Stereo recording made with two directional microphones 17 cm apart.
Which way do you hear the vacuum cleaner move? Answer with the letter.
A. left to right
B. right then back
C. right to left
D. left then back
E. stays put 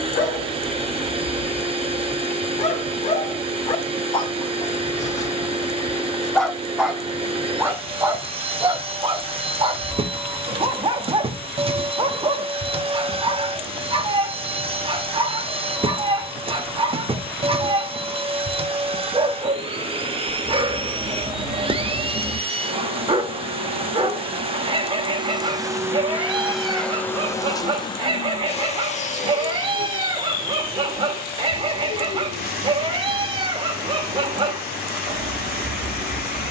C.